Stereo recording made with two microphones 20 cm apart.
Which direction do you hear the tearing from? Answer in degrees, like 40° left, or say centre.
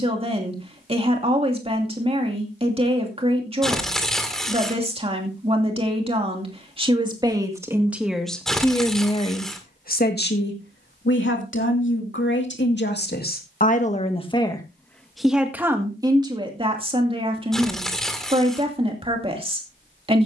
centre.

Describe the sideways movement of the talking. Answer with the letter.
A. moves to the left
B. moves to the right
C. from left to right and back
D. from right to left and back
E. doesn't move
D.